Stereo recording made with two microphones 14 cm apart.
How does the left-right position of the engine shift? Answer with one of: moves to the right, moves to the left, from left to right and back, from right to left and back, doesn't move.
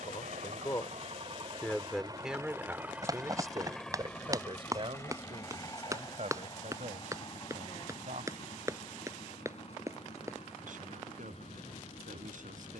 moves to the left.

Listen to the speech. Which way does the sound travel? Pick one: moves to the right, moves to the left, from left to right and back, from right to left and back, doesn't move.
moves to the right.